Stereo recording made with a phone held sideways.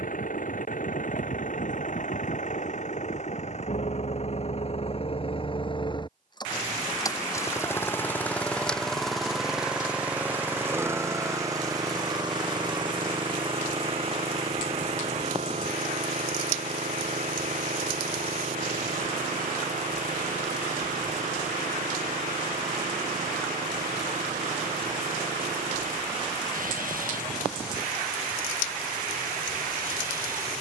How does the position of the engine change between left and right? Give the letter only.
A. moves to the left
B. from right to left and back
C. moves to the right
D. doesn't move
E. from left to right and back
C.